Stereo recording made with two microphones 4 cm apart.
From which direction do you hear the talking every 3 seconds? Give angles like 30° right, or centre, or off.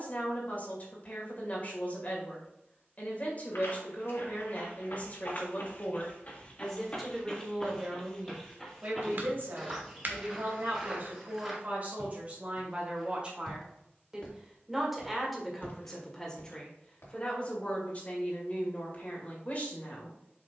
40° left, 40° left, 10° right, 50° right, 20° right, 20° left, 40° left.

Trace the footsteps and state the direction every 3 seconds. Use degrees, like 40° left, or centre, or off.
off, 60° left, 20° left, 10° right, 10° left, 60° left, off.